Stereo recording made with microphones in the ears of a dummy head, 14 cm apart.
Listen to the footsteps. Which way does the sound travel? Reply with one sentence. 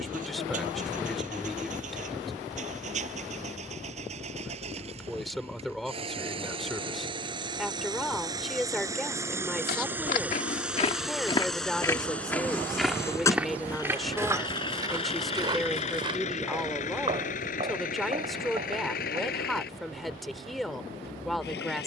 In this clip you hear the footsteps move to the right.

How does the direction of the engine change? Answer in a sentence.
In this clip you hear the engine move from right to left.